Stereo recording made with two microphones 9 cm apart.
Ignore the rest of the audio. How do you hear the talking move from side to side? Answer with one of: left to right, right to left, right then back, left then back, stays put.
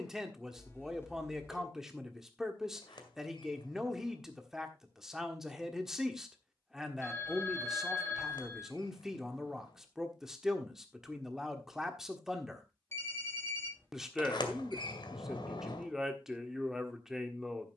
stays put.